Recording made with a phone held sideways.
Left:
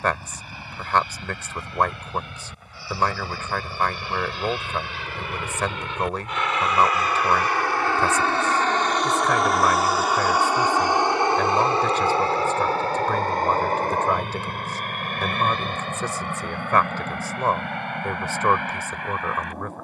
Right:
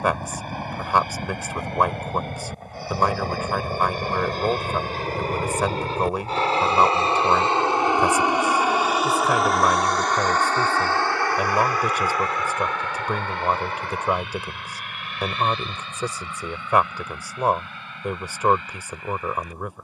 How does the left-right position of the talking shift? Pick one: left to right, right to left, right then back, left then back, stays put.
stays put.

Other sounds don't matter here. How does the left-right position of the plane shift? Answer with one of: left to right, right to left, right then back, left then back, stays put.
right to left.